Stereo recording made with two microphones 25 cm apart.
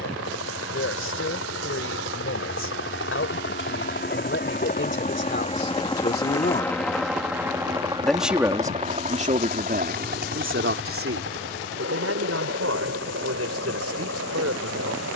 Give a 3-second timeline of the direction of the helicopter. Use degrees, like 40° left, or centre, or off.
60° left, 40° left, 10° right, 40° right, 60° right.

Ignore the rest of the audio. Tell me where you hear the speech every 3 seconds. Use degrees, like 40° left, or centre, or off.
60° left, 50° left, 10° left, 50° right, 70° right.